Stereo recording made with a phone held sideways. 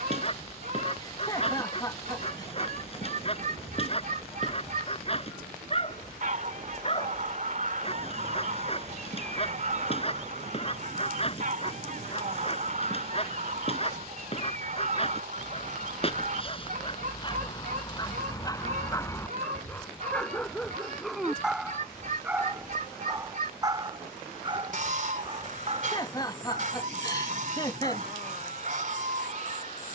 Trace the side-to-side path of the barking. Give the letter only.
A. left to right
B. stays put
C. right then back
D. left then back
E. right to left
A.